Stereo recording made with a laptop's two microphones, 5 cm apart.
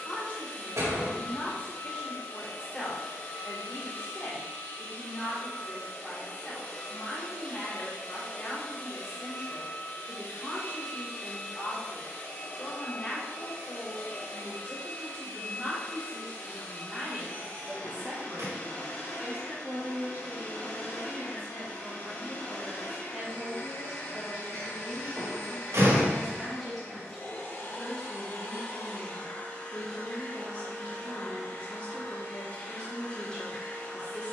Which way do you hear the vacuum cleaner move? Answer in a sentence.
In this clip you hear the vacuum cleaner stay in one place.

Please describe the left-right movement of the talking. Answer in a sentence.
You can hear the talking go right and come back.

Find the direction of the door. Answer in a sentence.
In this clip you hear the door on the right.